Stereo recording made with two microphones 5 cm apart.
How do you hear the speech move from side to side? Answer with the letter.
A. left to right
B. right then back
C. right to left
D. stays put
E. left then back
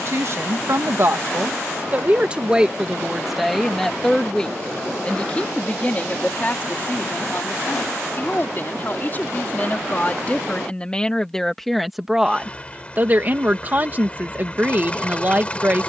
E.